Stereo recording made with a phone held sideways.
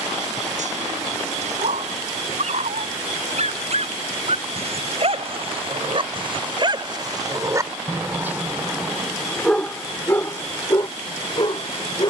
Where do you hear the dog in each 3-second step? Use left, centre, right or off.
right, right, right, left.